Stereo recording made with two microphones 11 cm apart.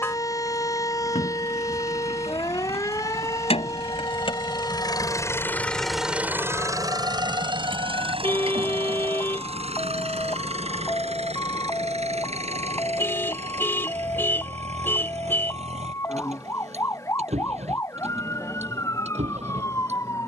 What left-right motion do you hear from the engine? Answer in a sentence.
In this clip you hear the engine go from the left side to the right.